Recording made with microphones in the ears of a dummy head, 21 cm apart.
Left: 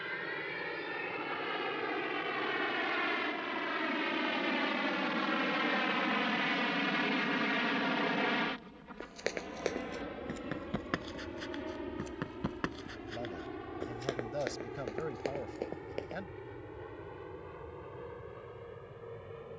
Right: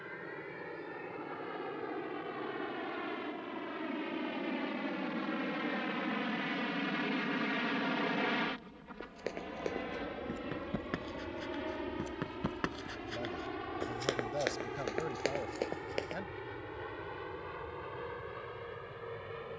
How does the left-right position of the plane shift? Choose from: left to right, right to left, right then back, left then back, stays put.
left to right.